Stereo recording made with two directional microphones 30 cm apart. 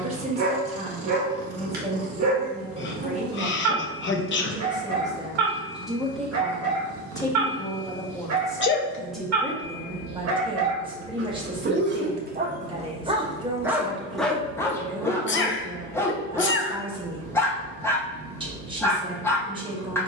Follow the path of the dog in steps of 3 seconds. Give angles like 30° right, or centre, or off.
60° right, 60° right, 60° right, 50° right, 10° right, 10° left, 10° left.